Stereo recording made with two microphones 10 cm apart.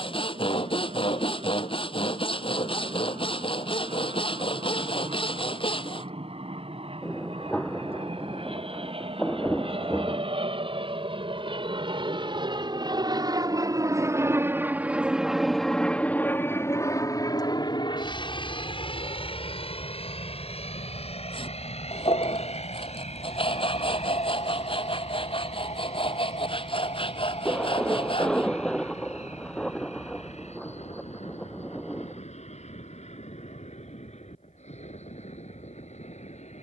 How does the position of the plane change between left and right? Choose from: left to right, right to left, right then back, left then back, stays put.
right to left.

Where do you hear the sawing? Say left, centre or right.
left.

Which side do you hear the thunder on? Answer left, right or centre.
centre.